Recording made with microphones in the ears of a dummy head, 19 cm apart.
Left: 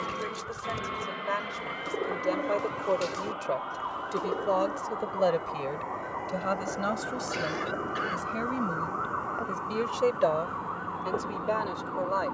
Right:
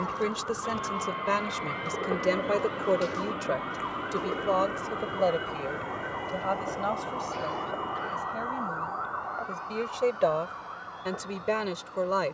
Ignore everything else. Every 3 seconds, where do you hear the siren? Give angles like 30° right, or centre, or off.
50° right, 20° right, 20° left, 50° left.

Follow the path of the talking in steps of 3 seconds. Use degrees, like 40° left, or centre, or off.
40° right, centre, 30° left, 10° right.